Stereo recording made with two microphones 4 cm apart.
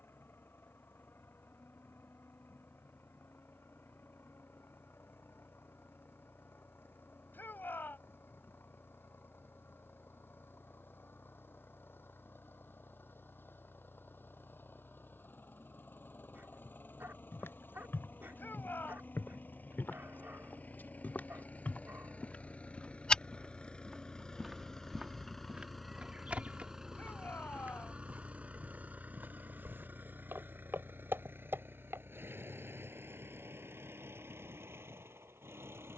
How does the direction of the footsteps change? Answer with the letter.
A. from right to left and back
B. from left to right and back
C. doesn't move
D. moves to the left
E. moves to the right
E.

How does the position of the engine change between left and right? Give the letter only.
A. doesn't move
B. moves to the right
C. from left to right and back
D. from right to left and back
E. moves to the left
B.